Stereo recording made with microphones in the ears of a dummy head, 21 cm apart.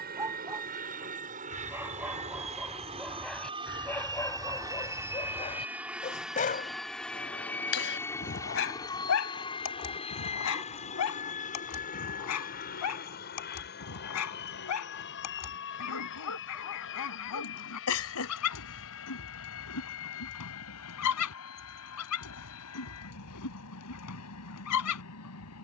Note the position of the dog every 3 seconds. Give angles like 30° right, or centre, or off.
10° right, 10° left, 50° left, 70° left, 80° left, 80° left, 80° left, 80° left, 80° left.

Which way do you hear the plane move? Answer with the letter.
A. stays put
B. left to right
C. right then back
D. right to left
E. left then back
D.